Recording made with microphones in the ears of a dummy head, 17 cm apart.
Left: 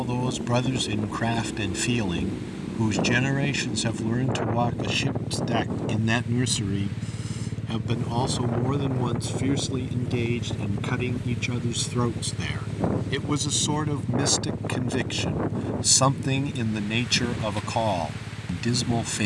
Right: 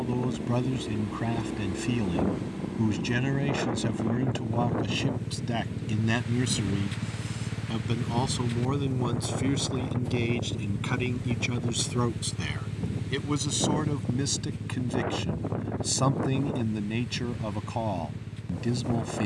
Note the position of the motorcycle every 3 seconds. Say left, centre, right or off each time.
right, right, right, centre, left, left, left.